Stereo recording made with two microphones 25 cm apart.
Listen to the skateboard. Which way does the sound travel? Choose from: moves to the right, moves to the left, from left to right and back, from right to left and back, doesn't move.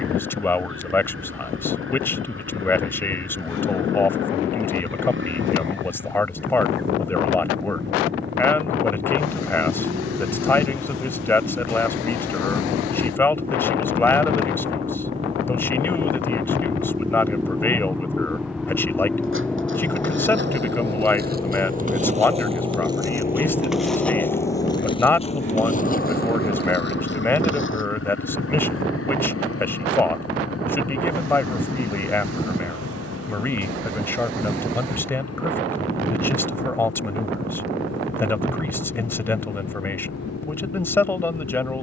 moves to the left.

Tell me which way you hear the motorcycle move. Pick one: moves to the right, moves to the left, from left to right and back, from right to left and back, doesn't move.
moves to the left.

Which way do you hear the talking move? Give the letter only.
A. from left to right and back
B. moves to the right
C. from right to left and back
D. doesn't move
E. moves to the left
D.